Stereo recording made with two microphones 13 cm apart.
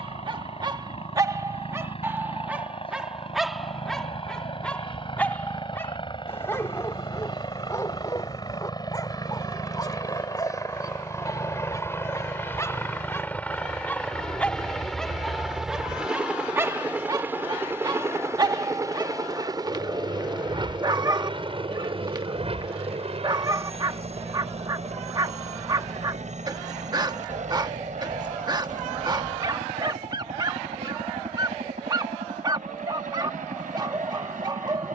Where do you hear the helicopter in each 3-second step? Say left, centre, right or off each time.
left, left, left, left, centre, centre, right, right, right, right, right, right.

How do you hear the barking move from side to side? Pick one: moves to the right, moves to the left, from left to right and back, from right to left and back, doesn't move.
from right to left and back.